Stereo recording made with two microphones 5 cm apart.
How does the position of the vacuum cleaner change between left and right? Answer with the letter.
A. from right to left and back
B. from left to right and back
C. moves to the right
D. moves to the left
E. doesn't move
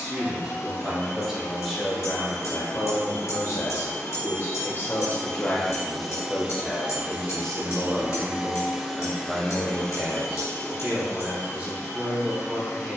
B.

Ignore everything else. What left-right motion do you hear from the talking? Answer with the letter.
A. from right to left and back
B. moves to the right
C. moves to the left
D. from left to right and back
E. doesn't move
A.